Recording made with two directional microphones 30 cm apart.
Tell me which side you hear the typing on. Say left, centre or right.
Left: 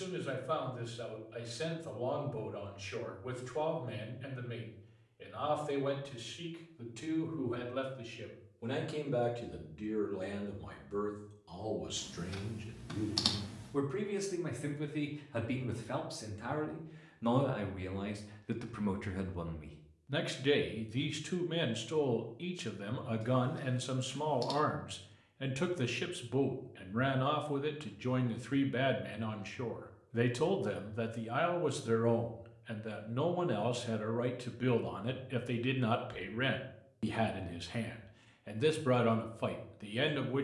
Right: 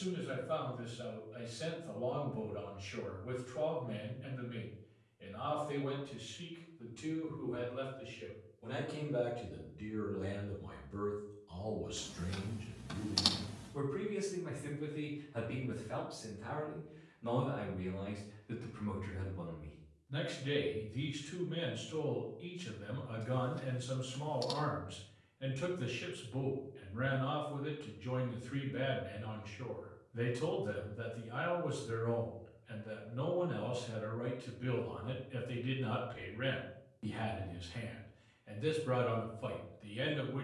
centre.